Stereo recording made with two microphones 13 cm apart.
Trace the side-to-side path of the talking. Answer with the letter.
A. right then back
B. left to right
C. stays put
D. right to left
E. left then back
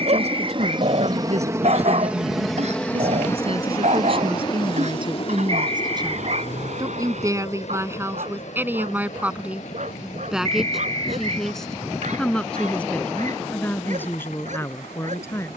D.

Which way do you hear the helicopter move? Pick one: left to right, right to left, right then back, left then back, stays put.
right to left.